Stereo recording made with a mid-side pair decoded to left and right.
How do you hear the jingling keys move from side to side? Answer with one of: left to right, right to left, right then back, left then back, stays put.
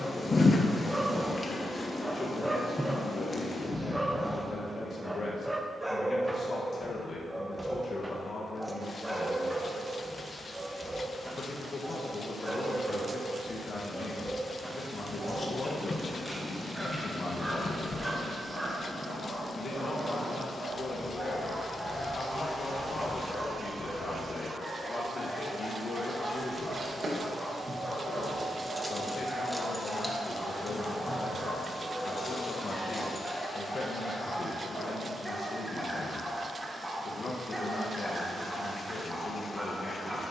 right to left.